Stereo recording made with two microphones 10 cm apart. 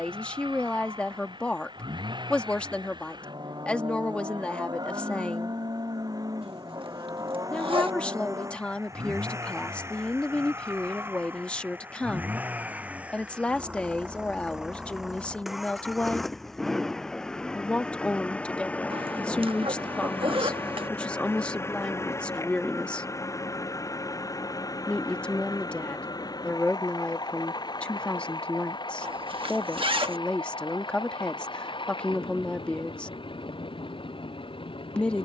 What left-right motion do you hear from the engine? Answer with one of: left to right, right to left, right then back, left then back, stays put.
right to left.